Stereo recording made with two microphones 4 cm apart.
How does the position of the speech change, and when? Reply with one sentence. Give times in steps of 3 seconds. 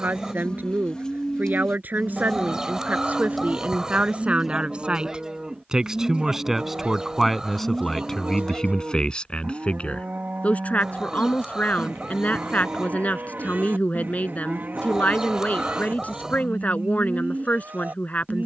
You can hear the speech on the right from 0 s, in the centre from 6 s and on the left from 9 s.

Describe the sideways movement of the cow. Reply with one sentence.
In this clip you hear the cow move from left to right.